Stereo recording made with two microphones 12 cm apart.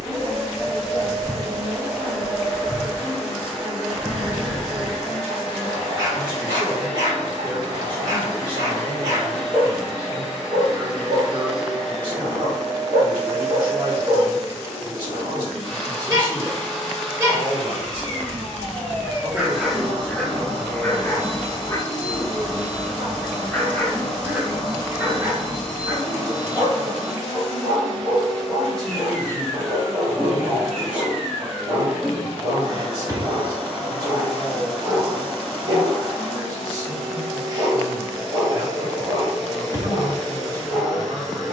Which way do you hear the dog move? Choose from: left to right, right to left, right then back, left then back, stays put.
left then back.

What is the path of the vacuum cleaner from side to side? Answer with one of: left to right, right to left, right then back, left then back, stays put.
stays put.